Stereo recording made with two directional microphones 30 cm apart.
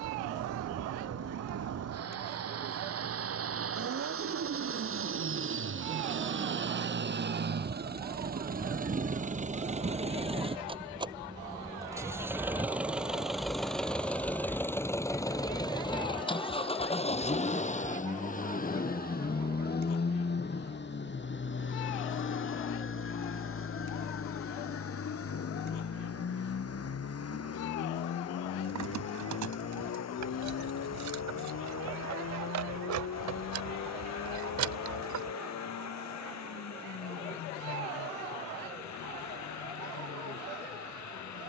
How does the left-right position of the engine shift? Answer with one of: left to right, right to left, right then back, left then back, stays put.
right to left.